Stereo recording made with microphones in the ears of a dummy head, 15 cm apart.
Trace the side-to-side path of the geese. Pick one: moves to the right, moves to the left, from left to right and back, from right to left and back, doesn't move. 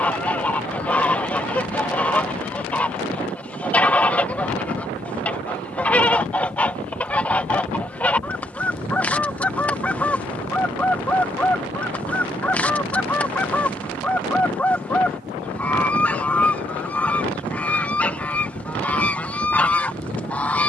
doesn't move.